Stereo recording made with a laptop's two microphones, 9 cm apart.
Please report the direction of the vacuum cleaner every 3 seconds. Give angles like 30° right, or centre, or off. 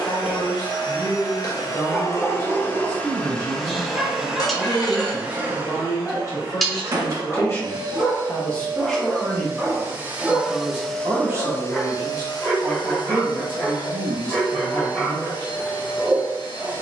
40° left, 10° right, 40° right, centre, 50° left, 50° left.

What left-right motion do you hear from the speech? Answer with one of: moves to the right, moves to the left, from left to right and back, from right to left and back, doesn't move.
moves to the right.